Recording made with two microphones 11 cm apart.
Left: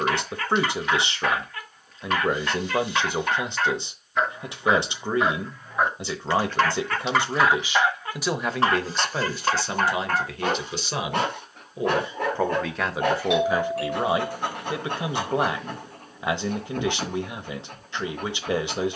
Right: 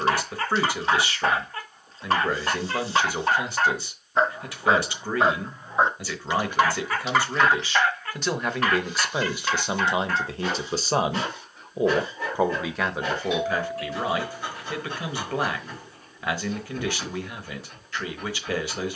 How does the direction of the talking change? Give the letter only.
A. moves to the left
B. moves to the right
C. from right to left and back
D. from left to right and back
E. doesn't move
D.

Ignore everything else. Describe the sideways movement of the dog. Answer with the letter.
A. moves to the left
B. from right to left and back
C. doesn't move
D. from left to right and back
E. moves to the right
A.